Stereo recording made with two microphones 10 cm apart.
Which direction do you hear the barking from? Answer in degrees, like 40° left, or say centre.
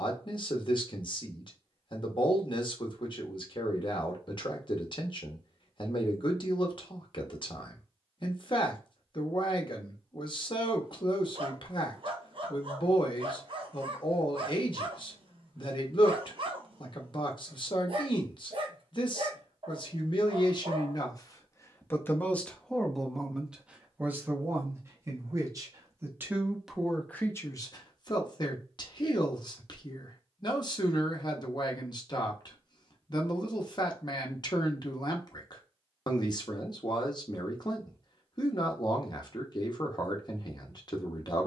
60° right.